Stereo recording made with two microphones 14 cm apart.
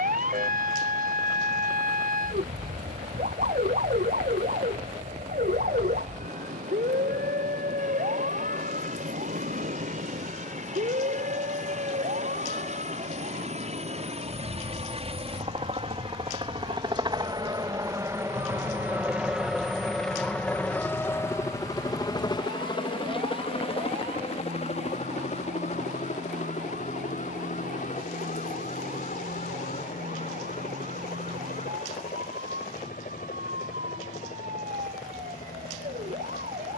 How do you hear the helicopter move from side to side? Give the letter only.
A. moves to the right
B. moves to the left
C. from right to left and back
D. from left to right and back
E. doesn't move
B.